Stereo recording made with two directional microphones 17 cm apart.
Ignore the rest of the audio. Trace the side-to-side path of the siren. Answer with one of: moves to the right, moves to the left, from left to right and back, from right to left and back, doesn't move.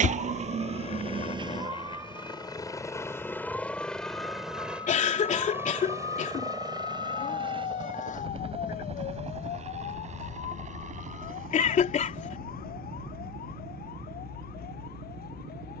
moves to the left.